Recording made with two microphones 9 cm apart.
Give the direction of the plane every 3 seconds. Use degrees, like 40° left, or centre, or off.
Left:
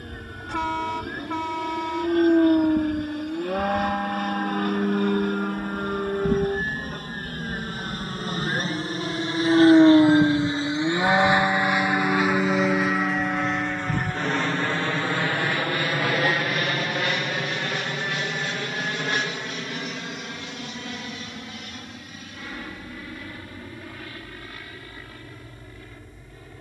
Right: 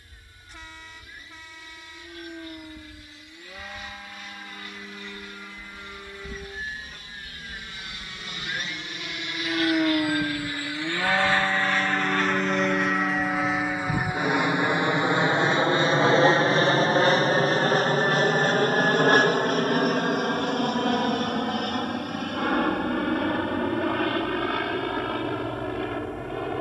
70° left, 60° left, 50° left, 20° left, centre, 30° right, 40° right, 50° right, 60° right.